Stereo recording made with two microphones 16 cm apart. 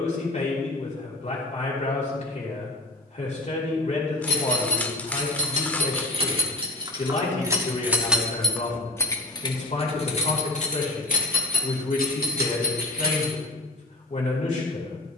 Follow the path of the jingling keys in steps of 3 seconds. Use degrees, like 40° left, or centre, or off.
off, 50° right, 20° right, 40° left, 70° left.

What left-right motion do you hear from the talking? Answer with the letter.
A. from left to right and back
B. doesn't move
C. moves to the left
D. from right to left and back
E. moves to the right
B.